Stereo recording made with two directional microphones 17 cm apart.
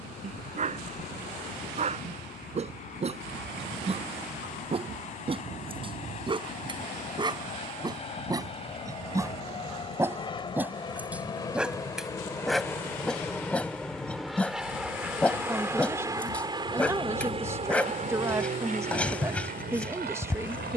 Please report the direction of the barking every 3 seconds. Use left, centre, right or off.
right, right, right, centre, centre, centre, centre.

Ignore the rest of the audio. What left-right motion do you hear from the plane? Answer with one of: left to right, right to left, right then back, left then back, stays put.
left to right.